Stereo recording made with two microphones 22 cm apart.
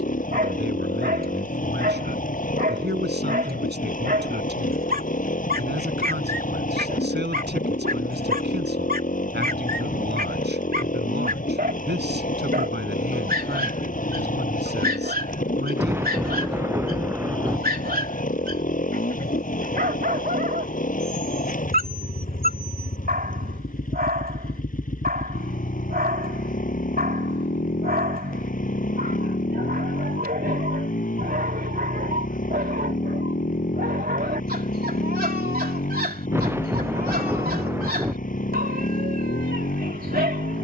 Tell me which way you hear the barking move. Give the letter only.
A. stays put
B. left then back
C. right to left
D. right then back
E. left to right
A.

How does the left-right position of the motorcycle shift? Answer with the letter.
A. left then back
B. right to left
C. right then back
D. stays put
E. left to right
D.